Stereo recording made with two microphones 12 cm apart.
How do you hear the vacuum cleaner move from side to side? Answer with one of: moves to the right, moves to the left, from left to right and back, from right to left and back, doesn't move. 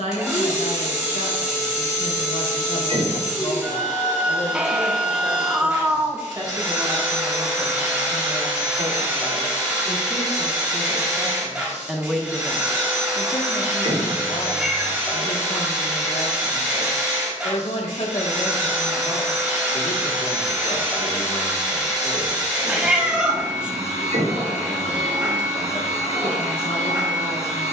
doesn't move.